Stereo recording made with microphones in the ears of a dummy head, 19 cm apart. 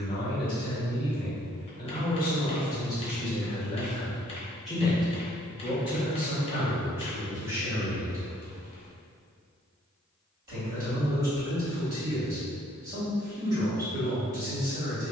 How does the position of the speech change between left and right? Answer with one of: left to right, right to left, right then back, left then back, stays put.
left to right.